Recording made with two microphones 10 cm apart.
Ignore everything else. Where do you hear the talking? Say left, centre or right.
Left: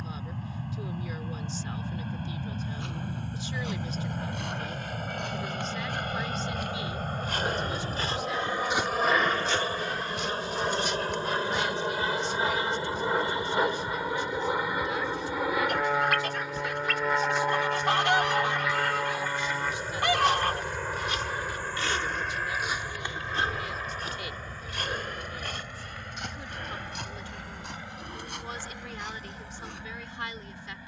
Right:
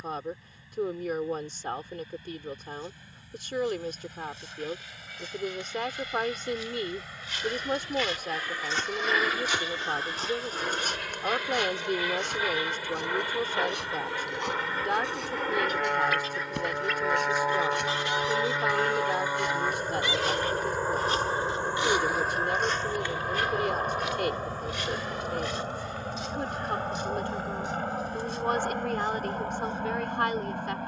right.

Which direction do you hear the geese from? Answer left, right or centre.
left.